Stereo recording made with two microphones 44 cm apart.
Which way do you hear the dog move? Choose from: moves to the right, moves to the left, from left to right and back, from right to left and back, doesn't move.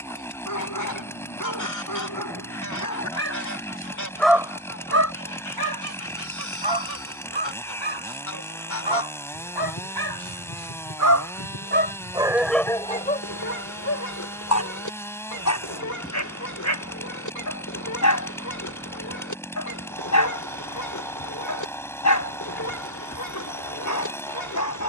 from left to right and back.